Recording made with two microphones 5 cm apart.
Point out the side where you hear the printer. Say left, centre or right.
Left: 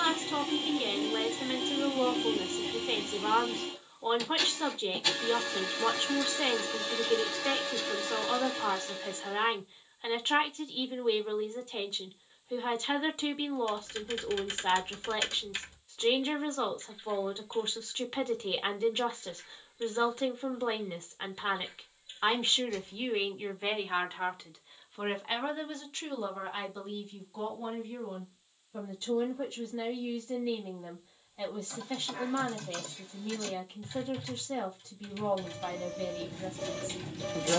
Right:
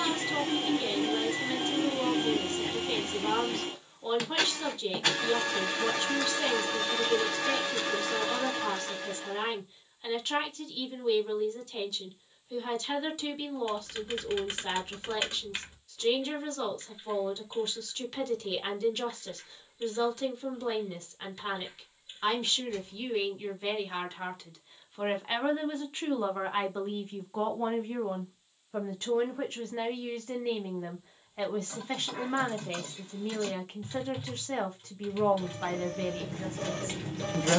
right.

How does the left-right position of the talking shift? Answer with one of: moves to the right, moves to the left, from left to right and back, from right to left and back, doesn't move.
moves to the right.